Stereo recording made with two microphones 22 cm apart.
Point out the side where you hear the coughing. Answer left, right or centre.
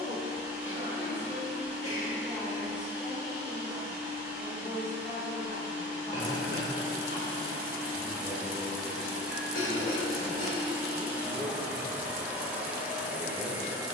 left.